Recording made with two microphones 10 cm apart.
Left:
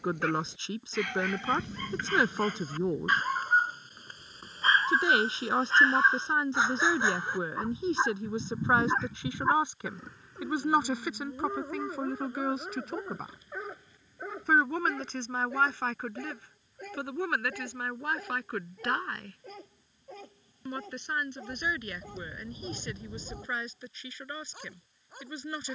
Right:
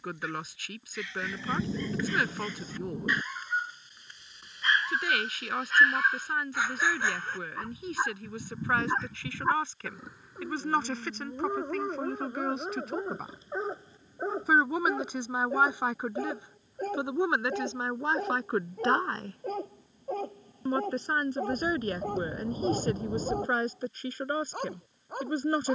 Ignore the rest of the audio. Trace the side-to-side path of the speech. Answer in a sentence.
In this clip you hear the speech move from left to right.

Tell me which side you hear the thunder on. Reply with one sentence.
In this clip you hear the thunder on the right.